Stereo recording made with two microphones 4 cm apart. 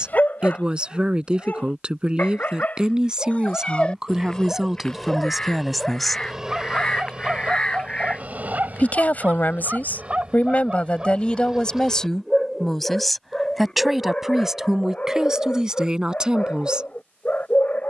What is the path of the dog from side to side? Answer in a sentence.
You can hear the dog move from left to right and back again.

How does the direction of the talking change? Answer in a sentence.
In this clip you hear the talking go left and come back.